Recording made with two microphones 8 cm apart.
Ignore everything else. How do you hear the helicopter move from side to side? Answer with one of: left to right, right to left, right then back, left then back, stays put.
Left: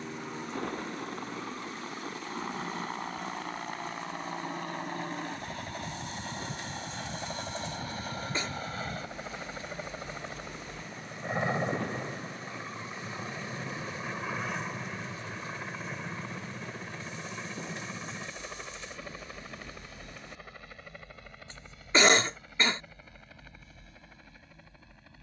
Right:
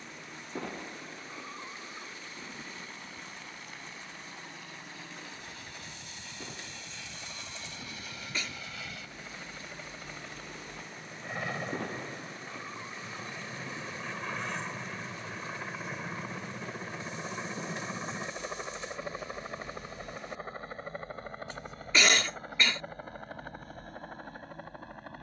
left to right.